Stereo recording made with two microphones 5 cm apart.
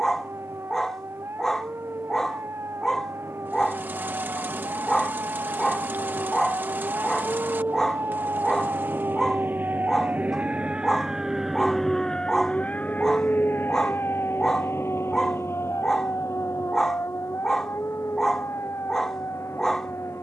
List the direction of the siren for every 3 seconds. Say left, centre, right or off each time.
right, right, right, right, left, left, left.